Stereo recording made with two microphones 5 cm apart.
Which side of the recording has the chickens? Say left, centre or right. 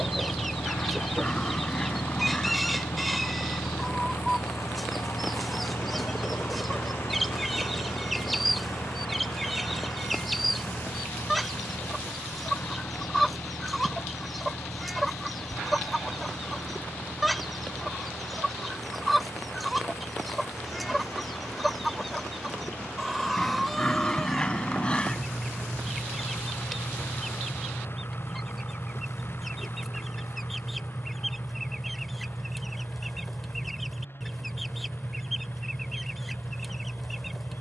centre.